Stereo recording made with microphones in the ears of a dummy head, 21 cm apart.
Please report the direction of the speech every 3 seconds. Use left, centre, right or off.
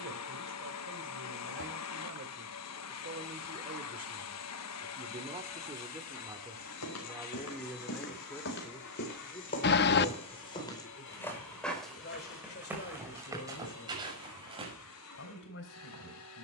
right, right, centre, left, left, left.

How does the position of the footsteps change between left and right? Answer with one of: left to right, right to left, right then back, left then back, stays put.
left to right.